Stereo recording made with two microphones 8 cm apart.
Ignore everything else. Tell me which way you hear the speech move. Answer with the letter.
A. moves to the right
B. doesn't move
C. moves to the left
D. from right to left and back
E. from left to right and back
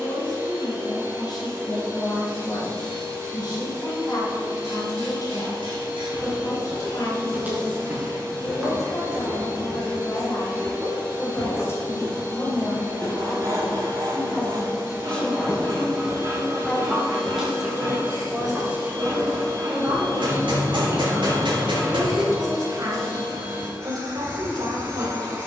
A.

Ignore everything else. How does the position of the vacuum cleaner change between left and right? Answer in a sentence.
In this clip you hear the vacuum cleaner stay in one place.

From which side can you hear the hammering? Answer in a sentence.
You can hear the hammering on the right.